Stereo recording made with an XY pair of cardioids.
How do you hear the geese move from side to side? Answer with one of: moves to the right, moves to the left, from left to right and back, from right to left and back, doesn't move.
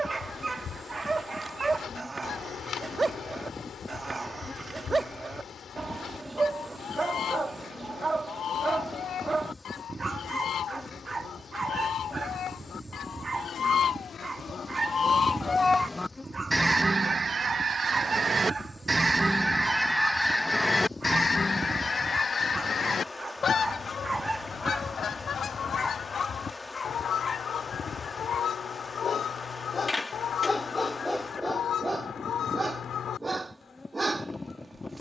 from left to right and back.